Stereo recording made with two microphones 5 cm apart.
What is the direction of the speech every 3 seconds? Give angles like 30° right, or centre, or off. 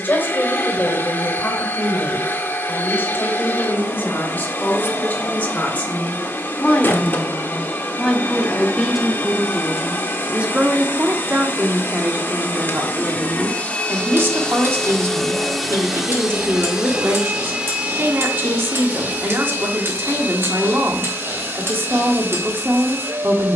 40° left, 30° left, 10° left, 30° right, 50° right, 50° right, 50° right, 50° right.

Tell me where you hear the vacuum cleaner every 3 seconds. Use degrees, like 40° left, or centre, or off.
40° left, 40° left, 40° left, 40° left, 30° left, 10° right, 40° right, 40° right.